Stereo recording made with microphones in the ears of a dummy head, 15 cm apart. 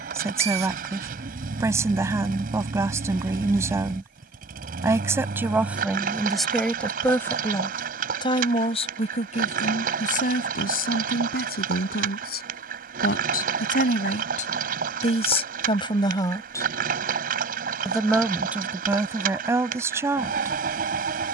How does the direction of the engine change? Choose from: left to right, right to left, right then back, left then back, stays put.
stays put.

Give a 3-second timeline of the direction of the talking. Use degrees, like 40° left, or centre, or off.
20° right, 10° right, 20° left, 60° left, 60° left, 30° left, 10° right.